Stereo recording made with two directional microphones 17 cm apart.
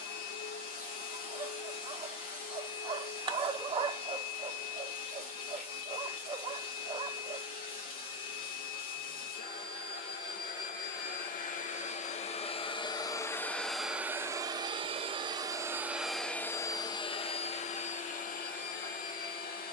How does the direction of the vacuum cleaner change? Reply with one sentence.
In this clip you hear the vacuum cleaner move from left to right and back again.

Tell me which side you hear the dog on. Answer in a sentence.
You can hear the dog on the right.